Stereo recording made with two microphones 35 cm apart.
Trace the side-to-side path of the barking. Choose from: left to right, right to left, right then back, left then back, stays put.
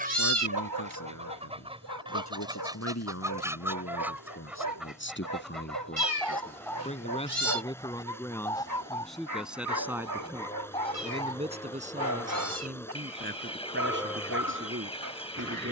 stays put.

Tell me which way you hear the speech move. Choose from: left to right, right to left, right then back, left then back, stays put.
left to right.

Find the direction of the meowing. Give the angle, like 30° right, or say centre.
40° right.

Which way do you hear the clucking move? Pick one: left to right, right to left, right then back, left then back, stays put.
right to left.